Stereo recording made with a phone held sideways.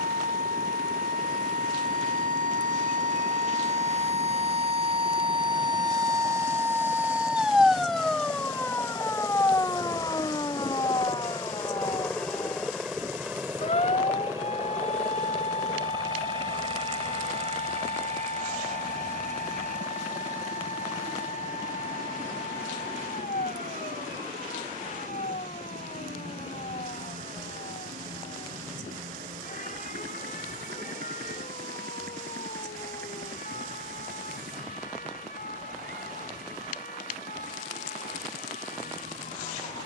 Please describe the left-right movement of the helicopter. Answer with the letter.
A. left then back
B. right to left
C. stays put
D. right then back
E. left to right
E.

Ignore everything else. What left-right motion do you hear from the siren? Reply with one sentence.
You can hear the siren travel towards the left.